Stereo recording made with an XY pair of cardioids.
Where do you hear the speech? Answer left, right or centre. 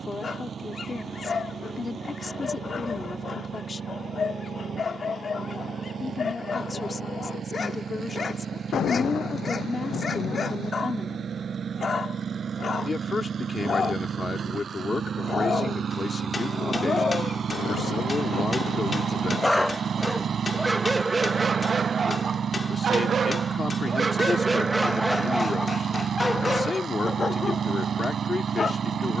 left.